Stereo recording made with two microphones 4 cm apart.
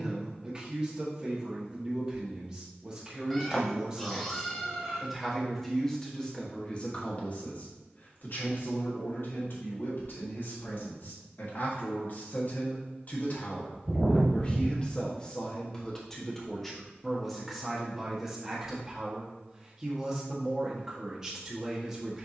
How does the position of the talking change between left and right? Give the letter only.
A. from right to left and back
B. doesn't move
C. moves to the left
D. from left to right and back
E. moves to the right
A.